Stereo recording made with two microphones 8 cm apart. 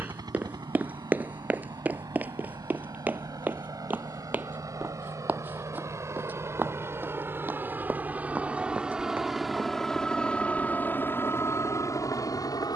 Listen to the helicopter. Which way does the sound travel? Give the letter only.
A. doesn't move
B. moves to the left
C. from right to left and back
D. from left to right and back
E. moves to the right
B.